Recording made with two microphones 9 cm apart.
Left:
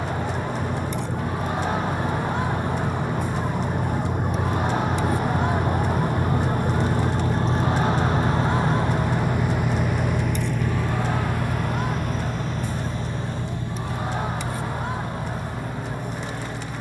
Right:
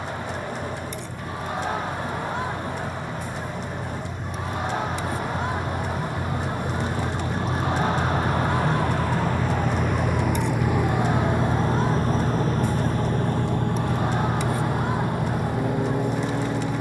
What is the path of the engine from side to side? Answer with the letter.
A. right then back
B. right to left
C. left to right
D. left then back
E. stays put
C.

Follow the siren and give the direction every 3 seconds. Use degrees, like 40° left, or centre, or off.
50° left, 30° left, 10° right, 50° right, 70° right, 80° right.